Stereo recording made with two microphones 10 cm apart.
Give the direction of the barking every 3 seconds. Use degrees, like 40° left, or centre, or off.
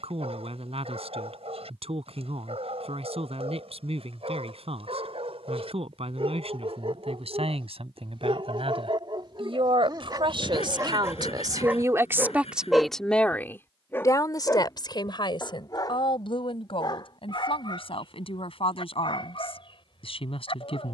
80° right, 80° right, 70° right, 40° right, 10° left, 50° left, 60° left.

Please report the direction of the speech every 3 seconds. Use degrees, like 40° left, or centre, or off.
80° right, 80° right, 80° right, 50° right, 20° left, 60° left, 70° left.